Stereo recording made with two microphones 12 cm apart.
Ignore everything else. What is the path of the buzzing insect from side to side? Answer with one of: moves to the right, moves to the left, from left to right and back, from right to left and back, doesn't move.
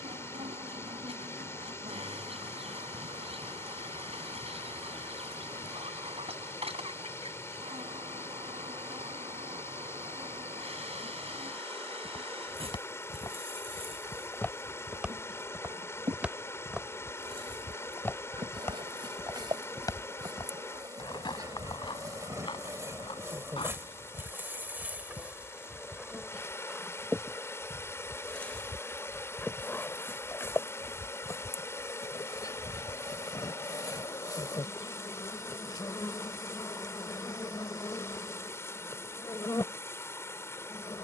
moves to the left.